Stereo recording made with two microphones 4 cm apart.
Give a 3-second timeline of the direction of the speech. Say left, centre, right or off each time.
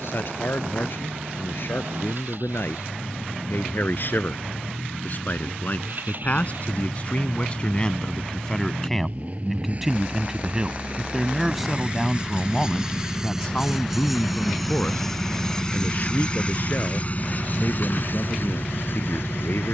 left, left, left, centre, left, left, left.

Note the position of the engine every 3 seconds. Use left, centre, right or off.
right, right, right, right, centre, left, left.